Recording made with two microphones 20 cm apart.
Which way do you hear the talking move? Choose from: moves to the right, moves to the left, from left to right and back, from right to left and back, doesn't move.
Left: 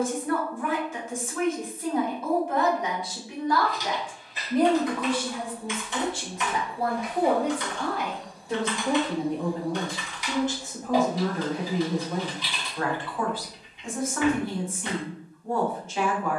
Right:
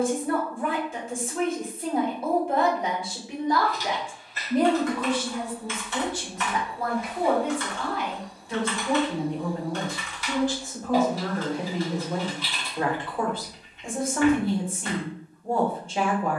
from right to left and back.